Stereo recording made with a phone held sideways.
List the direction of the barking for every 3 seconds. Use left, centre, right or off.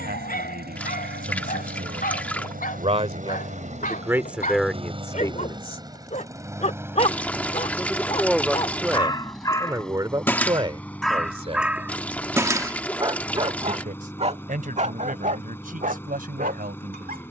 left, left, left, centre, right, right.